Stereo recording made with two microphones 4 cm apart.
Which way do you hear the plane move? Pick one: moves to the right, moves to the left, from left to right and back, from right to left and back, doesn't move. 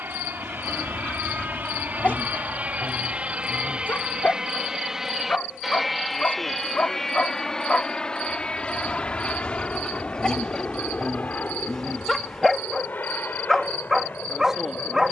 moves to the left.